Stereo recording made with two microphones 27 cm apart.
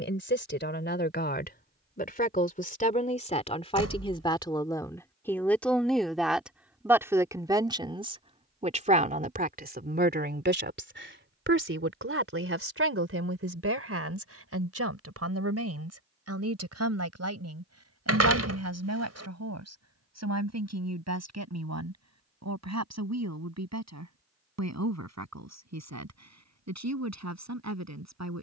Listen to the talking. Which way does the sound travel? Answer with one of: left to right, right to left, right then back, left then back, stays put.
left to right.